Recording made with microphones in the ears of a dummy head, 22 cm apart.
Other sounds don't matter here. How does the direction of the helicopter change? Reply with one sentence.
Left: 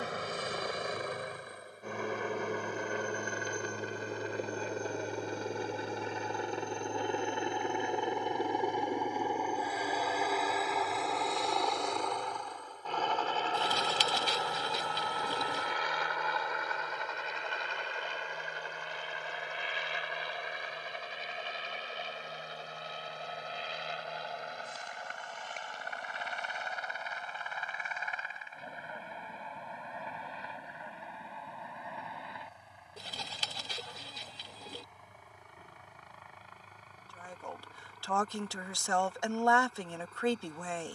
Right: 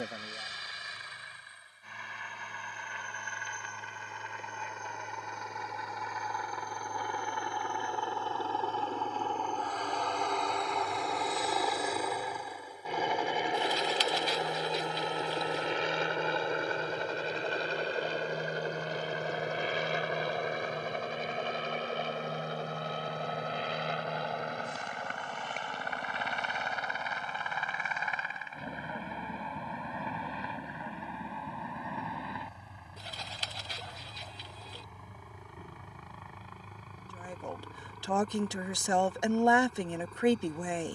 In this clip you hear the helicopter travel towards the right.